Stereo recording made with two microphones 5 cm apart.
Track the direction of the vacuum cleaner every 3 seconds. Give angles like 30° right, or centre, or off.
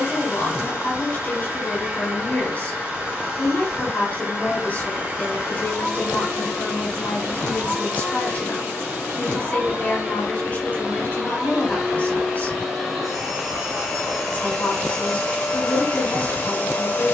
20° right, 20° right, 20° right, 20° right, centre, 20° left.